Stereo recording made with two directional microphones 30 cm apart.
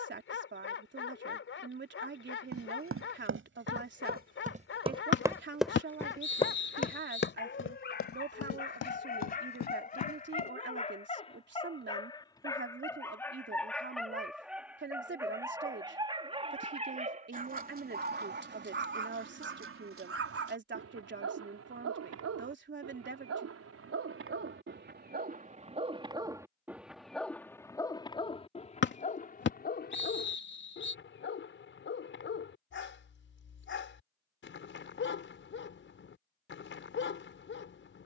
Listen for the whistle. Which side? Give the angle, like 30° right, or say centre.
40° left.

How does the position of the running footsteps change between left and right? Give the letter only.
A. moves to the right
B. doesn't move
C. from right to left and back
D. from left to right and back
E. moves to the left
E.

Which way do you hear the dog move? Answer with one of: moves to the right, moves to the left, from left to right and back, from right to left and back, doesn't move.
from left to right and back.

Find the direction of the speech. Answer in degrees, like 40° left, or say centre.
40° right.